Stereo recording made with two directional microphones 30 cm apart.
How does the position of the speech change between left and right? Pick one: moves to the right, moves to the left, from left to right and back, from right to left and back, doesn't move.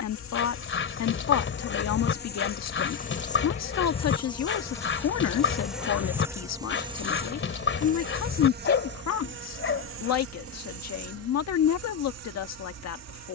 doesn't move.